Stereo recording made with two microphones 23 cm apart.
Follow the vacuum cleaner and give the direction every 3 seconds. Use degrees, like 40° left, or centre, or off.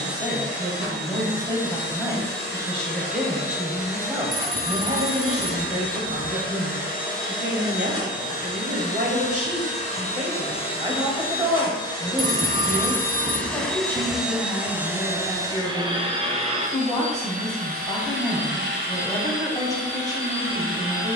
50° left, 50° left, 40° left, 30° left, centre, 30° right, 60° right.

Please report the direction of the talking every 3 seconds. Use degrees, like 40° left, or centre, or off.
10° left, 20° right, 40° right, 20° right, 10° left, 20° left, 20° left.